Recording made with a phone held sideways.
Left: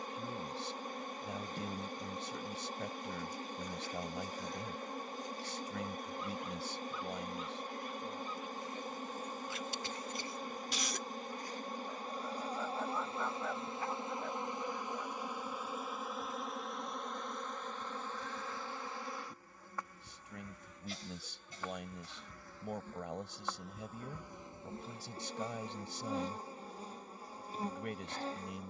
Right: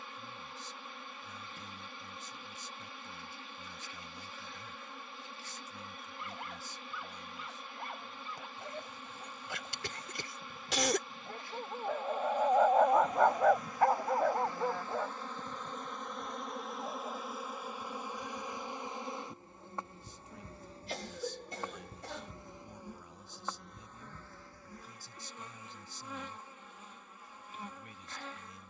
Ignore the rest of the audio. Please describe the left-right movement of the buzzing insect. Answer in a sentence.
In this clip you hear the buzzing insect move from left to right and back again.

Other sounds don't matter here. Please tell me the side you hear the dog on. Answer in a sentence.
In this clip you hear the dog on the right.